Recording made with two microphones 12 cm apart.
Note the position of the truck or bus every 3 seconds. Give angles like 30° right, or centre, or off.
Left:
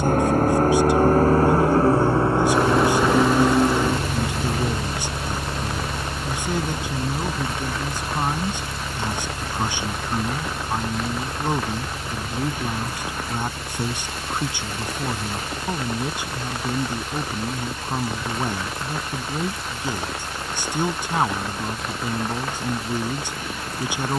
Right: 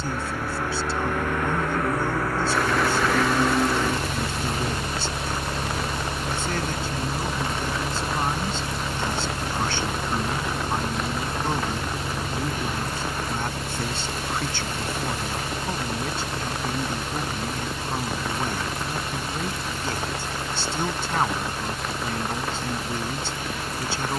30° left, 10° left, 20° right, 30° right, 40° right, 40° right, 50° right, 50° right.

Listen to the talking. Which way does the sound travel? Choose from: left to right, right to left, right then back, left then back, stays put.
stays put.